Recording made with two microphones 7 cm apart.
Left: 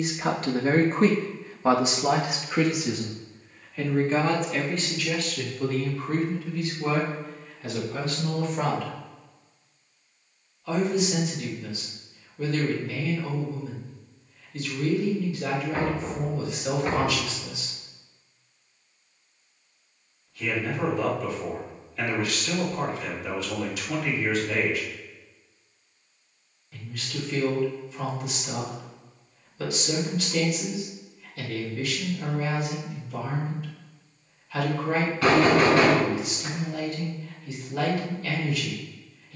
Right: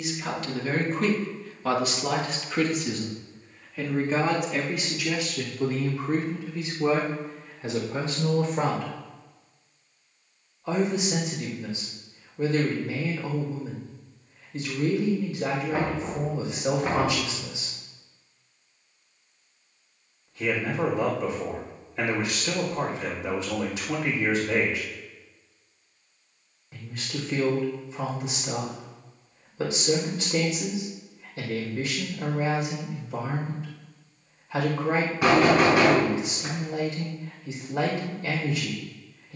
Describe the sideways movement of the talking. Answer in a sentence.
You can hear the talking move from left to right.